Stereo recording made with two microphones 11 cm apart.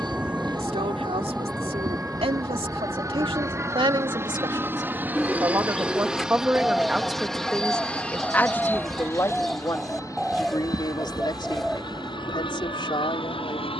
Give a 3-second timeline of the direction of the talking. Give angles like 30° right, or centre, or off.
70° right, 50° right, centre, 40° left, 50° left.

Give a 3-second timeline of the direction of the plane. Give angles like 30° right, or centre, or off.
40° right, 20° right, 10° left, 30° left, 50° left.